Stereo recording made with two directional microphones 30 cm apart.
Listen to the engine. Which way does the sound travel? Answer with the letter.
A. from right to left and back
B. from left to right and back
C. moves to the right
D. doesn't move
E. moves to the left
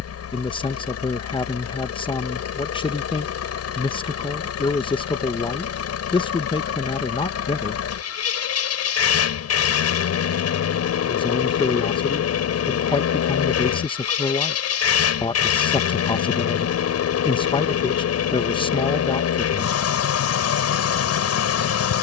D.